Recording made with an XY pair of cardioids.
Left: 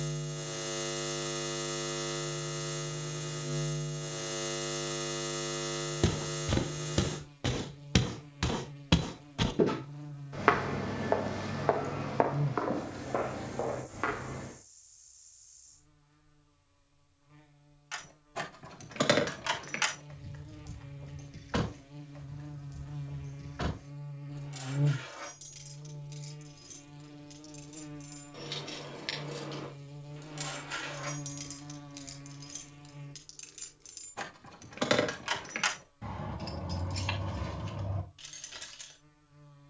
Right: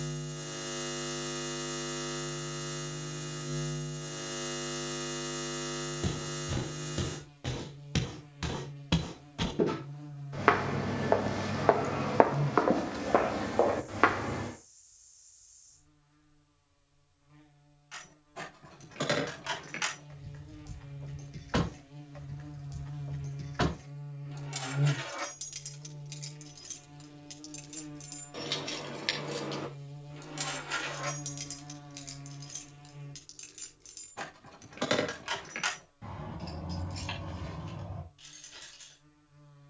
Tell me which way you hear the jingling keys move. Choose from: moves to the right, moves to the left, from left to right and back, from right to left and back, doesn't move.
from left to right and back.